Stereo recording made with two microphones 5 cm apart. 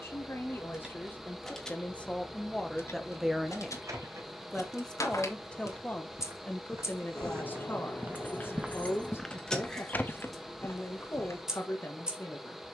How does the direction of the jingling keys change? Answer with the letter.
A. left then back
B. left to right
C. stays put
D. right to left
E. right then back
A.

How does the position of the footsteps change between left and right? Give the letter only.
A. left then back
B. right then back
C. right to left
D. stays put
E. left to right
C.